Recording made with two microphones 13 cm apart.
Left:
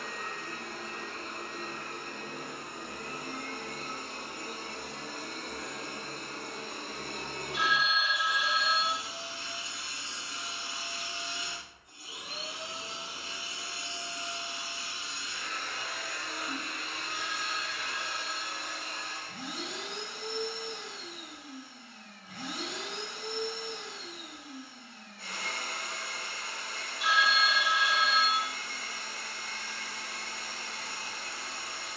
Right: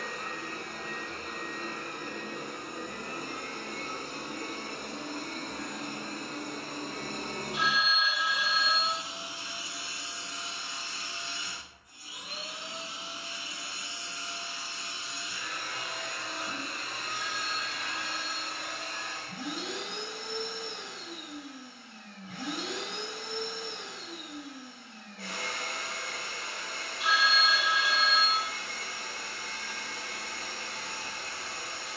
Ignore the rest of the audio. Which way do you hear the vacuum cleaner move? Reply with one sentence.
In this clip you hear the vacuum cleaner go left and come back.